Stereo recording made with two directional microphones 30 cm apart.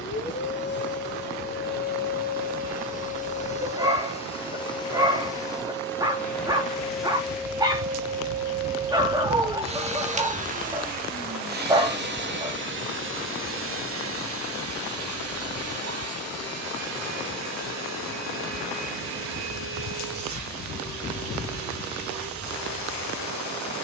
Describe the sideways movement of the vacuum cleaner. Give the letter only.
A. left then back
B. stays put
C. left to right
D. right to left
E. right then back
C.